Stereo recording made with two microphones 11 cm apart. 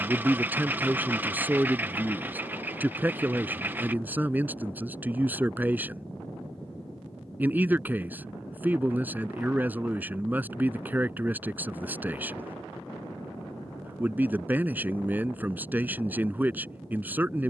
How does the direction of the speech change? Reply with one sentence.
In this clip you hear the speech stay put.